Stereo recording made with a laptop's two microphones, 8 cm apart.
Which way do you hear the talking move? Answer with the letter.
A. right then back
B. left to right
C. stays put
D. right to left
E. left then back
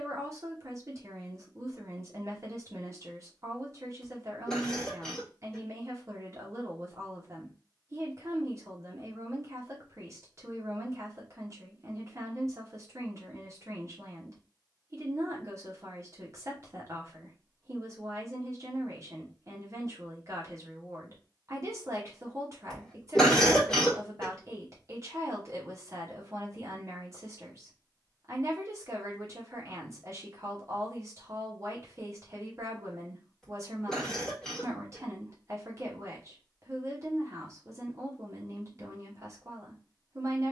C.